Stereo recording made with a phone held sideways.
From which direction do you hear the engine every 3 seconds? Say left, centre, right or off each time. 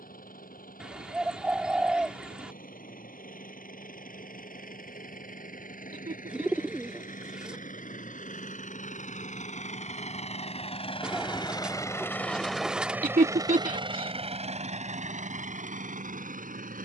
left, left, left, left, right, right.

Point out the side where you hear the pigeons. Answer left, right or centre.
centre.